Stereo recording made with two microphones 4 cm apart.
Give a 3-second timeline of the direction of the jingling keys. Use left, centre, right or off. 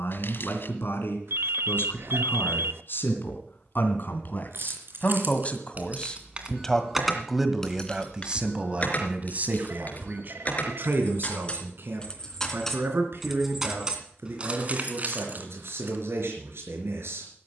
off, right, centre, left, centre, right.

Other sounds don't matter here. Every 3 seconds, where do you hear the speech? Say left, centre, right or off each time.
left, left, centre, right, right, right.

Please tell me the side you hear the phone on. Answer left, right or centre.
right.